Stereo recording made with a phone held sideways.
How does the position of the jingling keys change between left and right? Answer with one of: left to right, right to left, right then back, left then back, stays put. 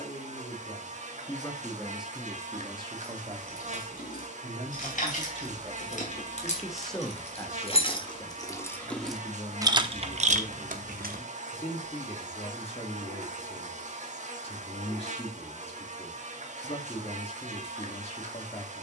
left to right.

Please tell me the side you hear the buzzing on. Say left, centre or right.
right.